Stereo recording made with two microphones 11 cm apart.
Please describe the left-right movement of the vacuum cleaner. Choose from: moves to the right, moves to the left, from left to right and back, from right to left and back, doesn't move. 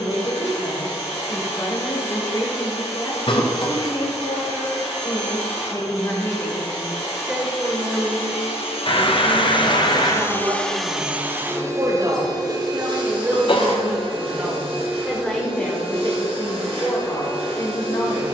moves to the right.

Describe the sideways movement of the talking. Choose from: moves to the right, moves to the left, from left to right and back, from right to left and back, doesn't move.
from left to right and back.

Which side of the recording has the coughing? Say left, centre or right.
left.